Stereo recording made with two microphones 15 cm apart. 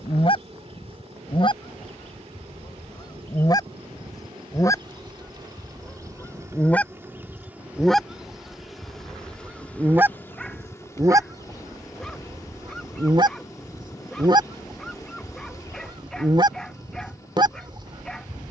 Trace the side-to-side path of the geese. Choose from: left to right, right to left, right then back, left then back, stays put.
left to right.